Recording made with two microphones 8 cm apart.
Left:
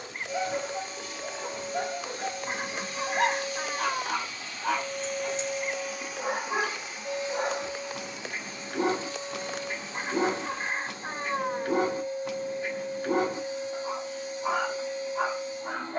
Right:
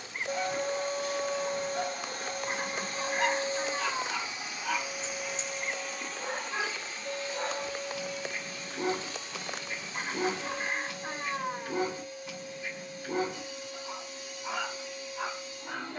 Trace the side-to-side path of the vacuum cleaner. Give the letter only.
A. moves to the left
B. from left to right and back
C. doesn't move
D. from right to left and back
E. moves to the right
A.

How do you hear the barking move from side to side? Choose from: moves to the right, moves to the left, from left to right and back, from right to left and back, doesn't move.
doesn't move.